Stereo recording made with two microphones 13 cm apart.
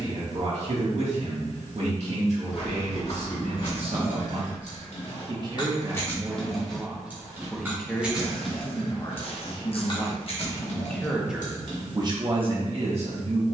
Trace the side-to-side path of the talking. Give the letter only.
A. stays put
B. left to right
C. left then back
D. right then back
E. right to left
C.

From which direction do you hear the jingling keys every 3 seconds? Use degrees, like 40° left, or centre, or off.
off, 60° left, centre, 50° left, off.